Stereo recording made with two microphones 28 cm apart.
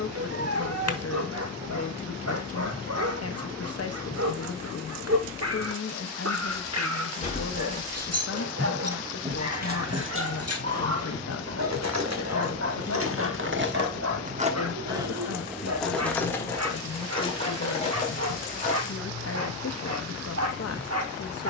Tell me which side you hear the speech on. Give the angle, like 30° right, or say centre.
60° left.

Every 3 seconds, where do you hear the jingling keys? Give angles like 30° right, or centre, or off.
off, off, 10° left, 60° right, 50° right, 10° left, 30° left.